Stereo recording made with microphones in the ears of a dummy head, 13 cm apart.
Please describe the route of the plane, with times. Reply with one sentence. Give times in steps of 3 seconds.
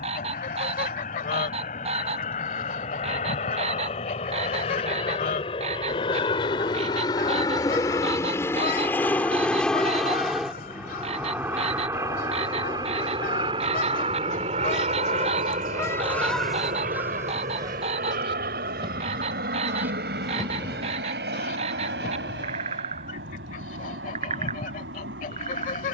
In this clip you hear the plane on the left from 0 s, in the centre from 9 s and on the right from 12 s.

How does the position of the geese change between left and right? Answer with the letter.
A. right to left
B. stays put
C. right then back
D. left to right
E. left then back
C.